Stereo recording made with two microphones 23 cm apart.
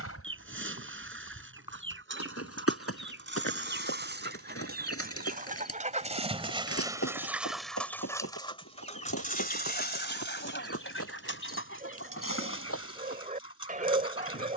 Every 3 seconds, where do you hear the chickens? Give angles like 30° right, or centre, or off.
60° right, 50° right, centre, 50° left, 70° left.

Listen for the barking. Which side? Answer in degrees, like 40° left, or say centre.
40° right.